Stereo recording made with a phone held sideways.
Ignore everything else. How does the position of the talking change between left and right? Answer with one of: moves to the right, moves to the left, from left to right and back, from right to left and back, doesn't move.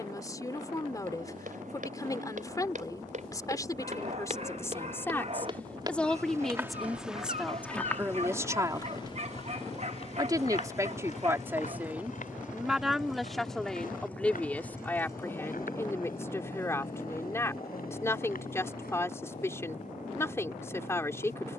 from left to right and back.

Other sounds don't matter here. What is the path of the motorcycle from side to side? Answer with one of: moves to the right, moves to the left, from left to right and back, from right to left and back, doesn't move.
moves to the left.